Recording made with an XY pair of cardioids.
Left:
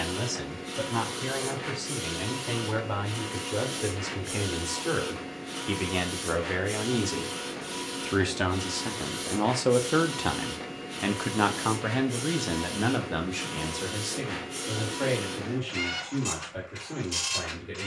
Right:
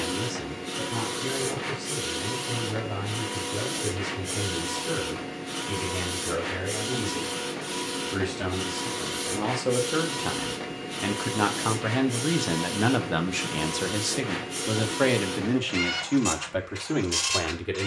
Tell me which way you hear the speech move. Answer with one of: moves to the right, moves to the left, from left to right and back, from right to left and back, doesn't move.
moves to the right.